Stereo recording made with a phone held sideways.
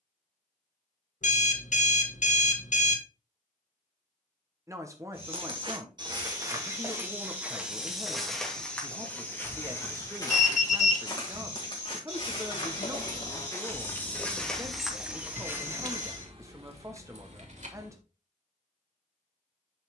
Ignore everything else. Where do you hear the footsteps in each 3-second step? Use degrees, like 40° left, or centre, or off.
off, 40° right, 10° right, 30° left, 20° left, 20° right, off.